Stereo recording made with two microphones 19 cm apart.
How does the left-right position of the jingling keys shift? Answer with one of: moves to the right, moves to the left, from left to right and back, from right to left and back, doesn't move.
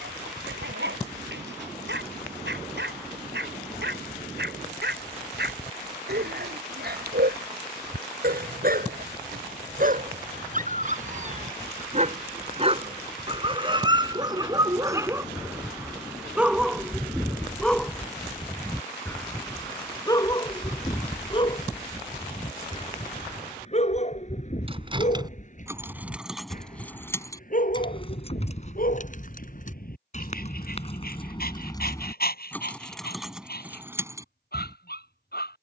from right to left and back.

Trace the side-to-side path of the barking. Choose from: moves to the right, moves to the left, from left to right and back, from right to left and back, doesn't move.
moves to the left.